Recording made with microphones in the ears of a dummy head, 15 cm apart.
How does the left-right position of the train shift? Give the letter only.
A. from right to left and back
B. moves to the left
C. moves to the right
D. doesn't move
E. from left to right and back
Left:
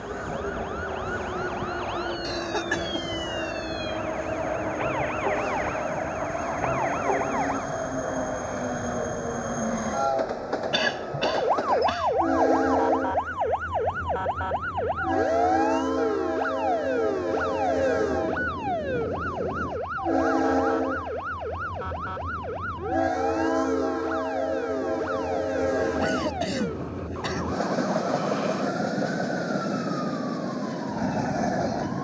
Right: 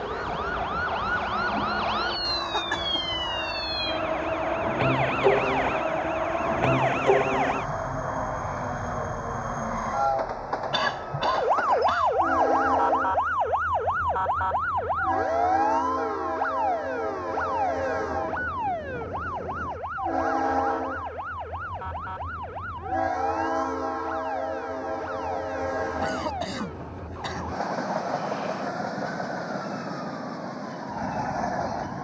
D.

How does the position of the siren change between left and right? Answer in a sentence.
In this clip you hear the siren move from right to left.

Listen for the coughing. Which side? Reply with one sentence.
You can hear the coughing on the left.